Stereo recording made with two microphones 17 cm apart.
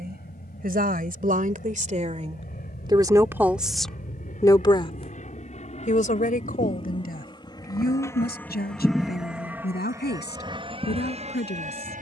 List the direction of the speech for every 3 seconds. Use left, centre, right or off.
right, centre, left, left.